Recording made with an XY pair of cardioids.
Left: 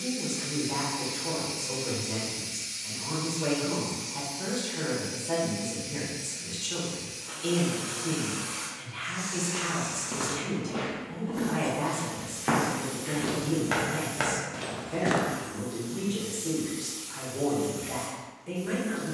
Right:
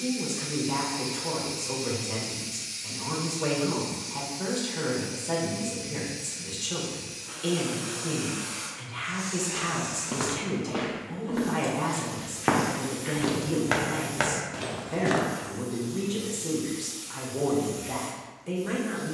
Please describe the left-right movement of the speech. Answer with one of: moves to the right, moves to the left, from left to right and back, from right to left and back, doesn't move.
doesn't move.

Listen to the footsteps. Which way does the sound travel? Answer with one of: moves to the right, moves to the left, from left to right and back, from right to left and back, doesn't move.
from left to right and back.